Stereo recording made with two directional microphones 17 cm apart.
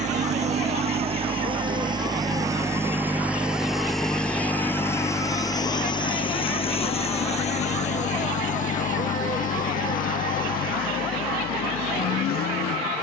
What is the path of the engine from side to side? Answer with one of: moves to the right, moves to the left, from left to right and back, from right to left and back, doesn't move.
moves to the left.